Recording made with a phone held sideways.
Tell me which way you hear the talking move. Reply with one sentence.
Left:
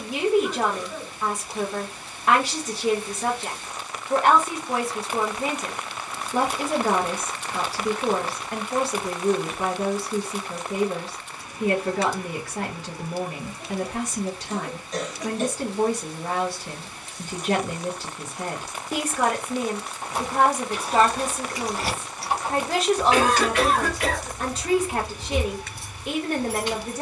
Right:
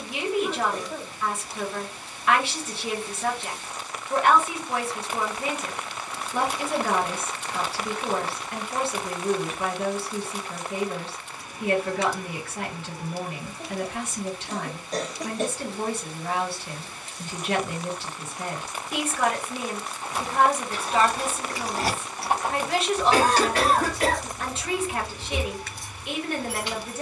You can hear the talking stay put.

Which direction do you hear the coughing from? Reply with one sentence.
You can hear the coughing on the right.